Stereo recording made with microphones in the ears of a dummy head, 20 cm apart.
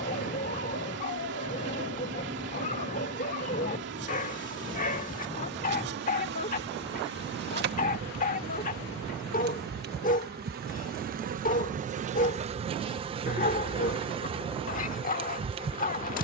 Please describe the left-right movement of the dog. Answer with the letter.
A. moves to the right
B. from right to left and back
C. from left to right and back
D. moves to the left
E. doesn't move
E.